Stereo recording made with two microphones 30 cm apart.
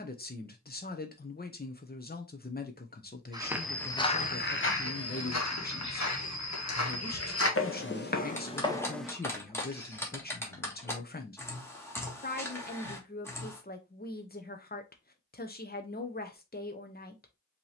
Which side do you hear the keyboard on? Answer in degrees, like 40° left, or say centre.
10° left.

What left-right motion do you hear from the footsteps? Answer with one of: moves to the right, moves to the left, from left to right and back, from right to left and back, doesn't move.
from right to left and back.